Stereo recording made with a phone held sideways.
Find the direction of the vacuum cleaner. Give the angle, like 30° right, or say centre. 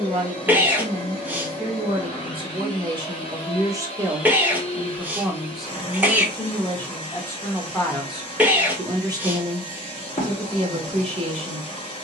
30° left.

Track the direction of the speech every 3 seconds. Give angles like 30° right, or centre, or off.
40° right, 10° right, centre, 40° right.